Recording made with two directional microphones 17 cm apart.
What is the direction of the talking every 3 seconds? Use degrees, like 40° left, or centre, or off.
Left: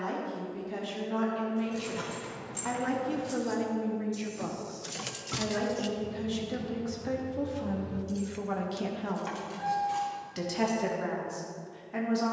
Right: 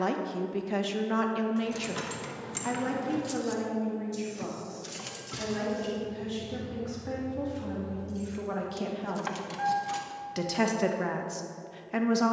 40° right, 20° left, 10° left, 30° right.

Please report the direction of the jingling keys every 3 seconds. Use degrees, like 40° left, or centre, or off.
60° right, centre, 50° left, 50° right.